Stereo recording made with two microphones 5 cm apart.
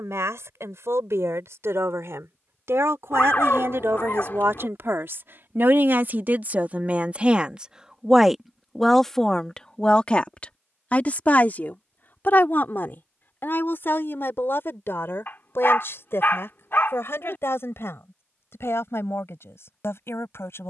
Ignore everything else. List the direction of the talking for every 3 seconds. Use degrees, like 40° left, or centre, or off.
80° right, 60° right, 30° right, 20° left, 50° left, 60° left, 60° left.